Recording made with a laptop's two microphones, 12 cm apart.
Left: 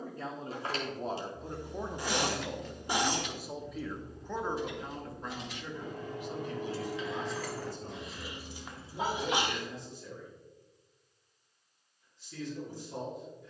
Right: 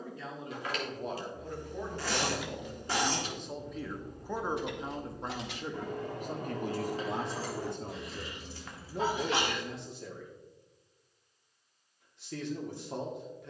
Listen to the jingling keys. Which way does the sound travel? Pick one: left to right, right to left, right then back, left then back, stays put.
right then back.